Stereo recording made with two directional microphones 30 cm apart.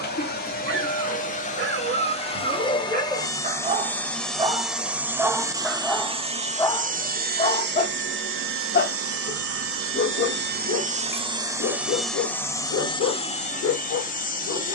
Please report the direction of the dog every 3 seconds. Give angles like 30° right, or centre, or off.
40° right, 10° right, 20° left, 50° left, 50° left.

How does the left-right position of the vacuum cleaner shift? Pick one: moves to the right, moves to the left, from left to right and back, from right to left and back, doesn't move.
from left to right and back.